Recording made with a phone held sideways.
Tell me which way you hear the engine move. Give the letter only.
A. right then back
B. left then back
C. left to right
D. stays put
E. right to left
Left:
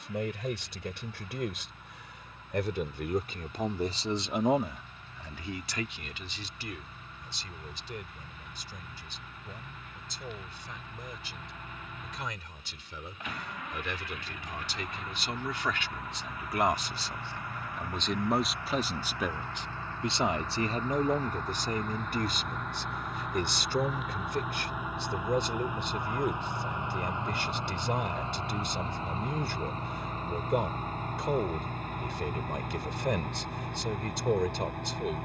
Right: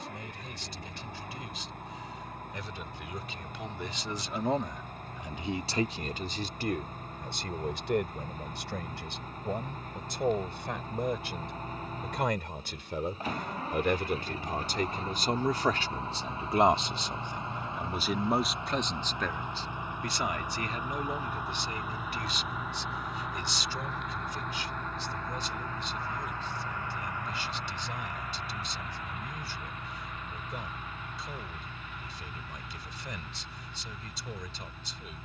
E.